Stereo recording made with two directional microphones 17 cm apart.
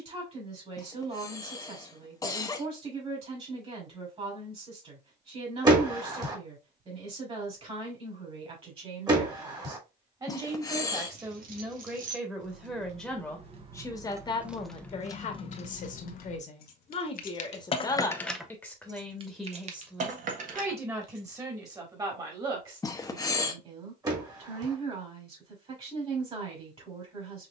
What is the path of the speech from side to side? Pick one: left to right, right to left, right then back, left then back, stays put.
left then back.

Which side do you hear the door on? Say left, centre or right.
right.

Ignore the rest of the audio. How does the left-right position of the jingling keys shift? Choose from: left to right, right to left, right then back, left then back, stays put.
left then back.